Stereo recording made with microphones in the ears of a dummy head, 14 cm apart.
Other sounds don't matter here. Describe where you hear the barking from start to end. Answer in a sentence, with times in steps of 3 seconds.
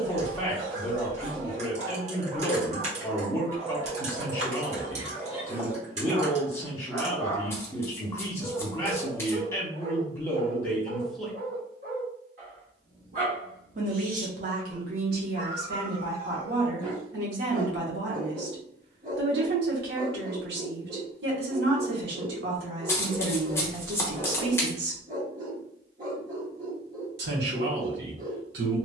You can hear the barking on the right from 0 s, in the centre from 6 s and on the right from 9 s.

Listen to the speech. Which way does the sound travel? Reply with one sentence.
You can hear the speech travel towards the right.